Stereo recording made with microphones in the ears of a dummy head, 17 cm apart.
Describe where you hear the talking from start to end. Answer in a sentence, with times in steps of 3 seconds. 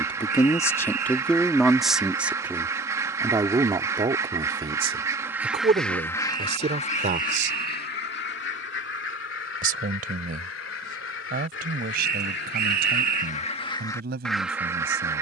In this clip you hear the talking in the centre from 0 s and on the right from 3 s.